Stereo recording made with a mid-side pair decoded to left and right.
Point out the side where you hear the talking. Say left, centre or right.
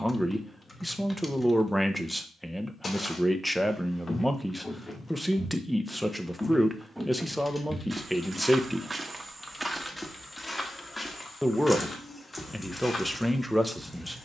centre.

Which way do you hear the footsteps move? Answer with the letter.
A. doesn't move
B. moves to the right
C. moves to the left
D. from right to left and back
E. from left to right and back
E.